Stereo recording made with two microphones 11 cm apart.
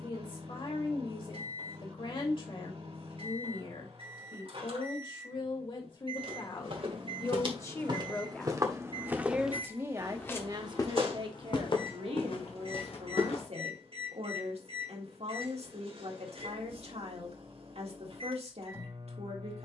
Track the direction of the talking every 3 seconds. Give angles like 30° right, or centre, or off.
50° left, 50° left, 30° left, 40° right, 70° right, 70° right, 70° right.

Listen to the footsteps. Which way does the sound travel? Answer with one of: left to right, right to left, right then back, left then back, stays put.
right to left.